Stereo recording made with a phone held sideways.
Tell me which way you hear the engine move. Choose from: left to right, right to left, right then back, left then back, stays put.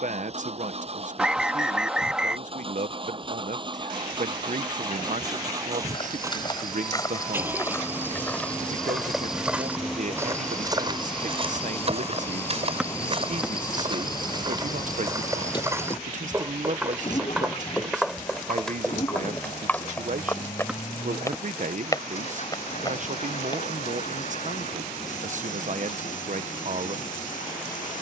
right to left.